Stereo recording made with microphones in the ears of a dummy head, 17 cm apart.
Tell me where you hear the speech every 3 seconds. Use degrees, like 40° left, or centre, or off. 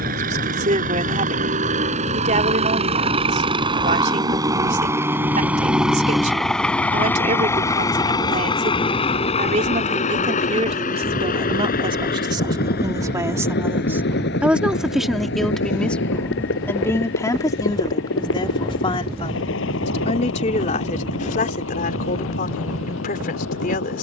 40° right, 40° right, 40° right, 30° right, 10° right, 10° left, 30° left, 50° left.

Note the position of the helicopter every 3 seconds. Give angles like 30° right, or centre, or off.
40° right, 20° right, 10° left, 40° left, 50° left, 60° left, 70° left, 70° left.